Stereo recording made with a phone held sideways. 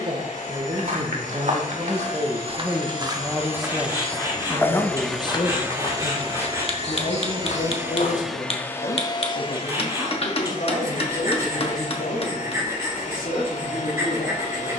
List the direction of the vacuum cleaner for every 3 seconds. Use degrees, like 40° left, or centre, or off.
60° left, 20° left, 20° right, 50° left, 60° left.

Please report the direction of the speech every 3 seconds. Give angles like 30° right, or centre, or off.
30° right, 20° left, 50° left, 70° left, 80° left.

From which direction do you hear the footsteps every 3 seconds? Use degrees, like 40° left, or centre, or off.
50° right, 10° left, 50° left, off, off.